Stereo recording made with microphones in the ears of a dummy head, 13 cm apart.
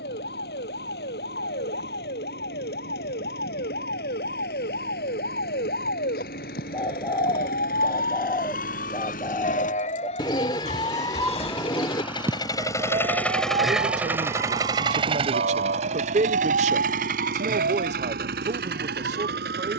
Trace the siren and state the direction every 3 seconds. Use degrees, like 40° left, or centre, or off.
80° left, 80° left, 70° left, 40° left, 40° right, 70° right, 80° right.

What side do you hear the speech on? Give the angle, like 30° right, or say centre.
50° right.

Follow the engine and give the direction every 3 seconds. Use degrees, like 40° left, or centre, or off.
80° left, 70° left, 70° left, 50° left, centre, 50° right, 70° right.